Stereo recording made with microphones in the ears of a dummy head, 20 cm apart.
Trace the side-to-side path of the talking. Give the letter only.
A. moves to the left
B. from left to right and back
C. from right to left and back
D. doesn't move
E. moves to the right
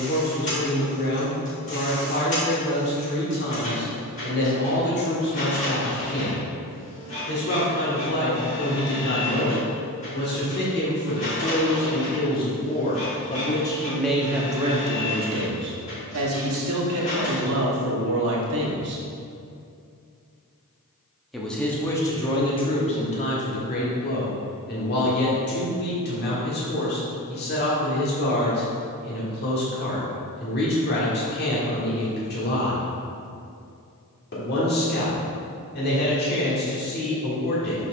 B.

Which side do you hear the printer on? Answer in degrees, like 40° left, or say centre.
30° left.